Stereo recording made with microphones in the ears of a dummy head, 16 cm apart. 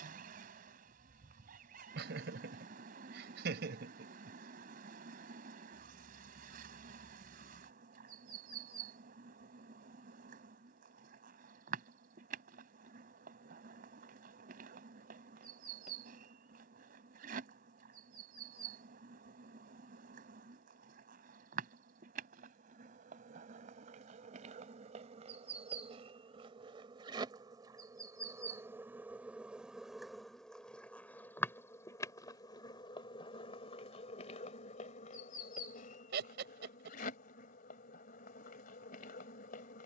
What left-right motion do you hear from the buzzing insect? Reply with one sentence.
You can hear the buzzing insect travel towards the left.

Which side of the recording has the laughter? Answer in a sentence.
In this clip you hear the laughter on the right.